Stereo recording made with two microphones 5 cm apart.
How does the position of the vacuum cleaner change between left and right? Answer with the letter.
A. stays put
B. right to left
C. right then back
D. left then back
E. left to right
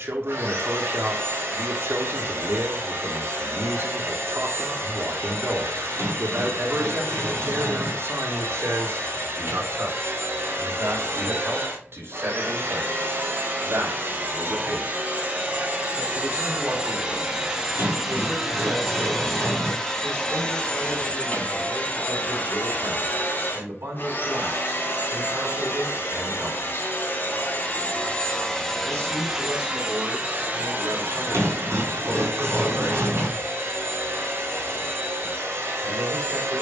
D.